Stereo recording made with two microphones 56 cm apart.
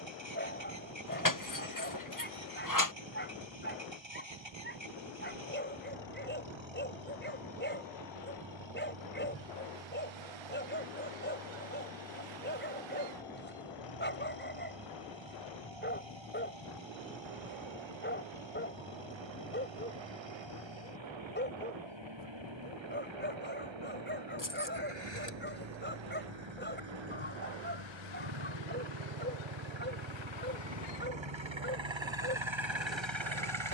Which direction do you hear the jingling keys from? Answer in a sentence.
In this clip you hear the jingling keys on the left.